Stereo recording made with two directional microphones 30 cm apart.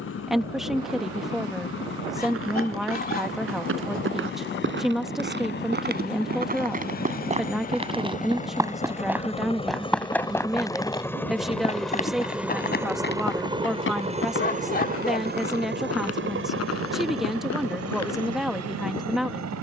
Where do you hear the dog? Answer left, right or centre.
left.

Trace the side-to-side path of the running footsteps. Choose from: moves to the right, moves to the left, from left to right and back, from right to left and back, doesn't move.
moves to the left.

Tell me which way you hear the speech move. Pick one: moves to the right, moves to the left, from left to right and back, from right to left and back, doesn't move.
doesn't move.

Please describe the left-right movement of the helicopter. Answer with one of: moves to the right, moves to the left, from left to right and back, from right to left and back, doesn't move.
moves to the right.